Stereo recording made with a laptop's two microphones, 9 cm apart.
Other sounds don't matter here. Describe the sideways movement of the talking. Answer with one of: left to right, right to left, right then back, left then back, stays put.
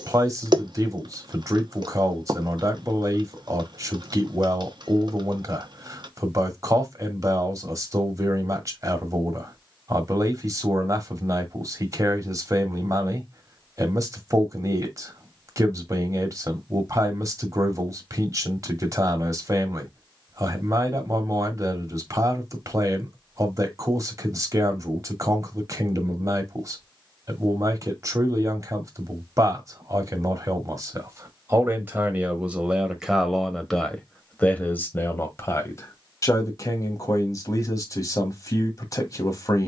right to left.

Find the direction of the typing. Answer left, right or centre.
right.